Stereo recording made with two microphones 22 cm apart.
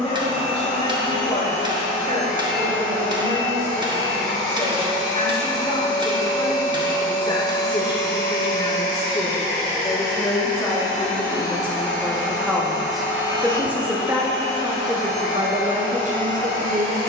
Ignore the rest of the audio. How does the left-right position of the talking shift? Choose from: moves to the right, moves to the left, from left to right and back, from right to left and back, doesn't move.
moves to the right.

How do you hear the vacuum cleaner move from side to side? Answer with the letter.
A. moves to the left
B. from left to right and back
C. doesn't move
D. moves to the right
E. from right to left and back
C.